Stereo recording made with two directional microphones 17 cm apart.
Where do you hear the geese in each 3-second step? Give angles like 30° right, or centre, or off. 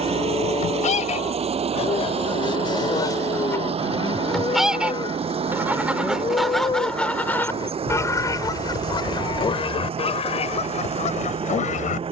40° left, centre, 10° left, 40° left.